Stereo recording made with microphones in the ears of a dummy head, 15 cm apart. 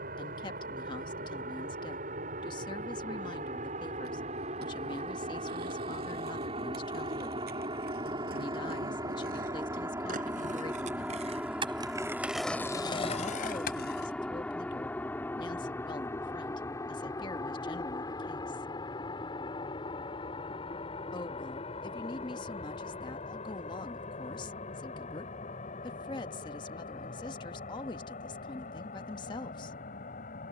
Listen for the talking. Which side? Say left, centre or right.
left.